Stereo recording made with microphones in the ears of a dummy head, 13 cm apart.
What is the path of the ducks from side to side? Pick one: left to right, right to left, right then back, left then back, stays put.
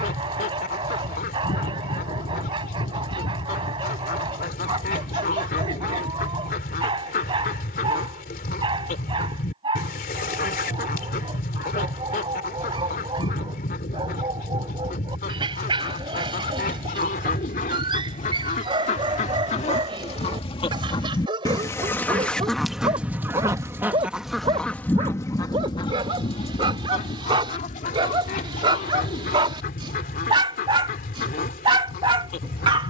right then back.